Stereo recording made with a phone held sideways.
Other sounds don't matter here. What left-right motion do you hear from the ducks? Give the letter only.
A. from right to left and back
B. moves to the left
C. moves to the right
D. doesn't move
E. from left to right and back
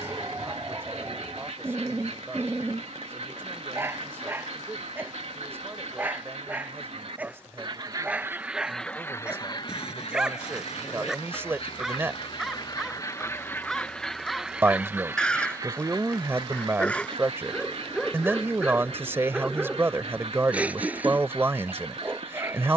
A.